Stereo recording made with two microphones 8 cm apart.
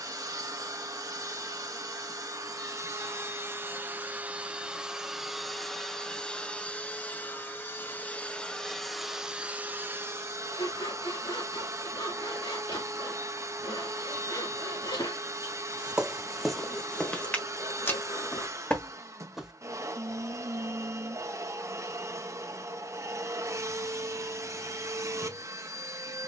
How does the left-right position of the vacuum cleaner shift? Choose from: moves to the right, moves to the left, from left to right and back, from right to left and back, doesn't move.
from right to left and back.